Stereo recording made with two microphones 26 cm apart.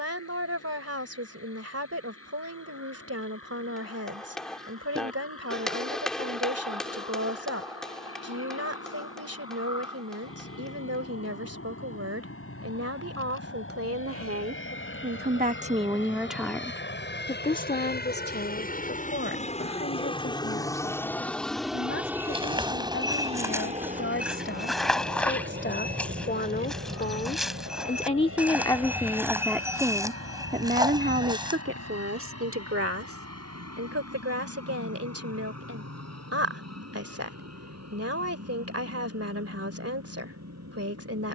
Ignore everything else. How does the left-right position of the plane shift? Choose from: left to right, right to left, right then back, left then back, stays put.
left to right.